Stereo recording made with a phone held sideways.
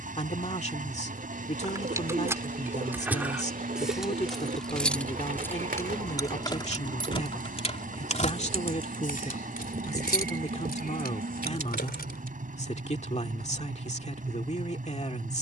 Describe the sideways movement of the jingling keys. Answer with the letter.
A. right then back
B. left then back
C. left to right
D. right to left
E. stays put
D.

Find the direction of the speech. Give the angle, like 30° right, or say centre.
40° left.